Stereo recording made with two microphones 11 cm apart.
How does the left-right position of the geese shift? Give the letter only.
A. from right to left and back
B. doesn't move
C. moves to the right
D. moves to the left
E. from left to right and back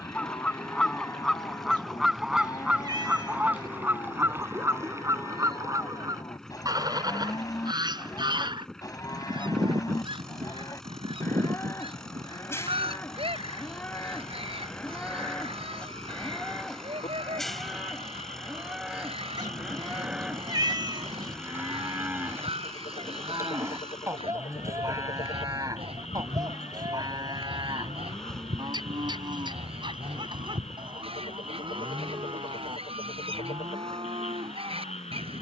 C.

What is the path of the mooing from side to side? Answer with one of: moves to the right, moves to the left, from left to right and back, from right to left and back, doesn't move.
moves to the right.